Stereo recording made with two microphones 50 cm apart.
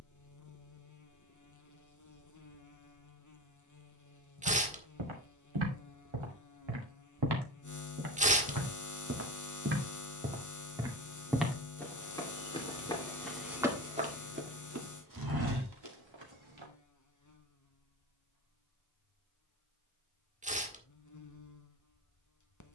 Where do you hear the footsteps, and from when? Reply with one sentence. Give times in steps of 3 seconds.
In this clip you hear the footsteps not at all from 0 s, on the right from 3 s, in the centre from 9 s, on the right from 15 s and not at all from 18 s.